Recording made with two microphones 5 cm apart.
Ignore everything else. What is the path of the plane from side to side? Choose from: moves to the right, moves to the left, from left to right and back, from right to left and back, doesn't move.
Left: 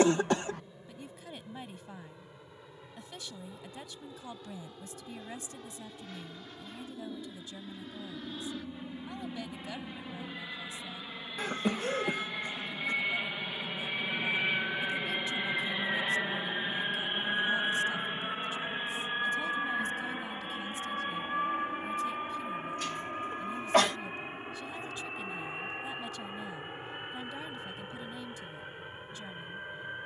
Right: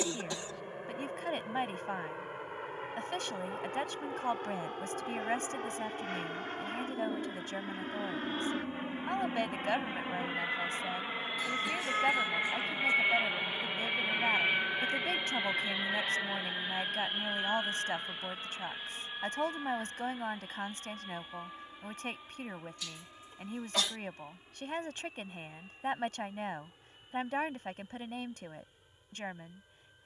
moves to the left.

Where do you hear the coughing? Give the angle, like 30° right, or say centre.
60° left.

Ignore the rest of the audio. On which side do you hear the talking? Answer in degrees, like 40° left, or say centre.
60° right.